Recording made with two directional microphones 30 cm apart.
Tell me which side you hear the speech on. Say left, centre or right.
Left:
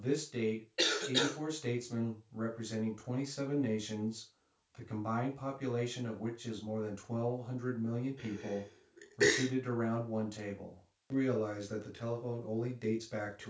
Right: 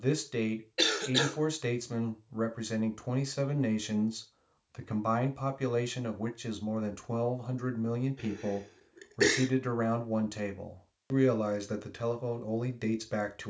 right.